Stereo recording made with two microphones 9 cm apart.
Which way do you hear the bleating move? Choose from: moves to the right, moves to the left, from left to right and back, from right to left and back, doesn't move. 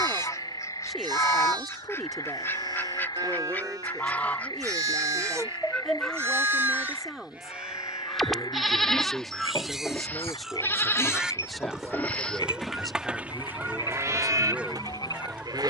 from right to left and back.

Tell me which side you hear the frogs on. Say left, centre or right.
left.